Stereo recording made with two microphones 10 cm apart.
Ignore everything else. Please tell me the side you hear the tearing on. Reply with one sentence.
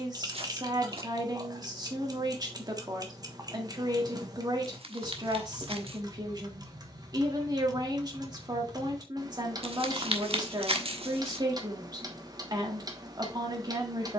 You can hear the tearing on the right.